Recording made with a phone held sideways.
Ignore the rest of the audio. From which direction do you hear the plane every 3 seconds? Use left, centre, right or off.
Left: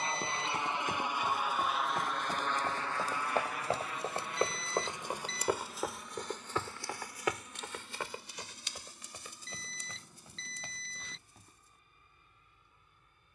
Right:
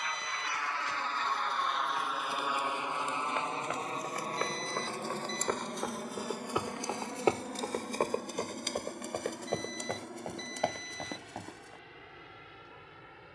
centre, right, right, right, right.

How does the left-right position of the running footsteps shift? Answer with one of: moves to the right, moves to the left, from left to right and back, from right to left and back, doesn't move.
moves to the right.